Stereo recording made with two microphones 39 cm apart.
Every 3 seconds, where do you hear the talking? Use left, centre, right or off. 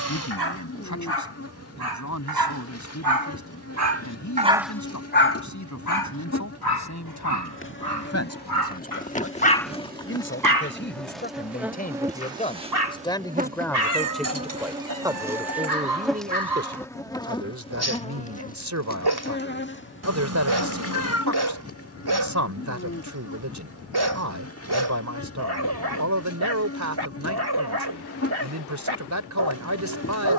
left, left, left, left, centre, right, right, right, right, right.